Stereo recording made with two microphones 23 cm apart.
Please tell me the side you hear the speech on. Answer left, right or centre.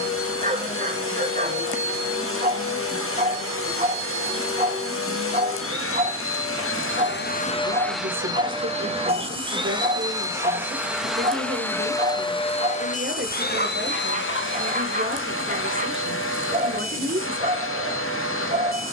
right.